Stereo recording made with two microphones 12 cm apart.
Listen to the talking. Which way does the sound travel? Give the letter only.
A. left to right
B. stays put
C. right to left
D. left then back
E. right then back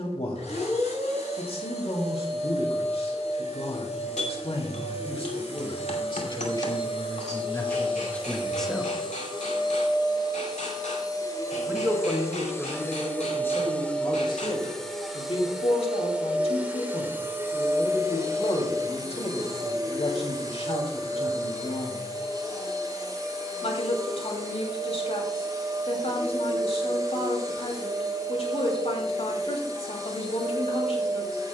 E.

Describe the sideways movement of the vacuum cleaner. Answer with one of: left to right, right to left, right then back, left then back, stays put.
left to right.